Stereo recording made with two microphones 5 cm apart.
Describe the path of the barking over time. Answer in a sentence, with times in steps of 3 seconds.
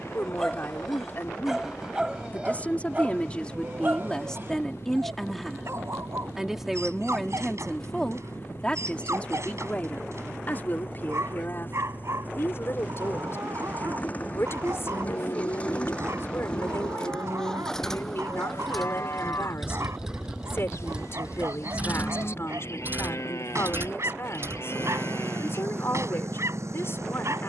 In this clip you hear the barking in the centre from 0 s and on the right from 3 s.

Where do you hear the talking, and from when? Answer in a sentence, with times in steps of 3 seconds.
You can hear the talking on the left from 0 s, in the centre from 3 s and on the left from 9 s.